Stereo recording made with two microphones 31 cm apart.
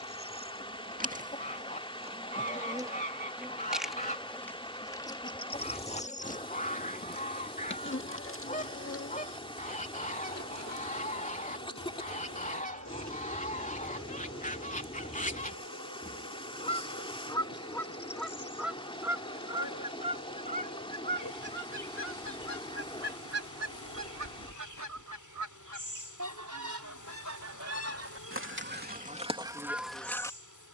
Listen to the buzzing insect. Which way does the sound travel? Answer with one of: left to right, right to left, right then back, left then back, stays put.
right to left.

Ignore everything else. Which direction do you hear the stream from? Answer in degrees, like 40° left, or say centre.
20° left.